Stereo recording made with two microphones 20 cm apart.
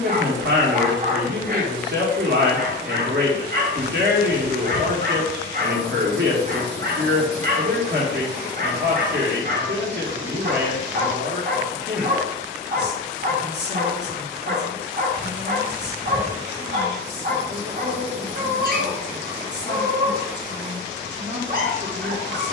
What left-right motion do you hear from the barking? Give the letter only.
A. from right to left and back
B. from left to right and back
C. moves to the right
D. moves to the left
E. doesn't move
E.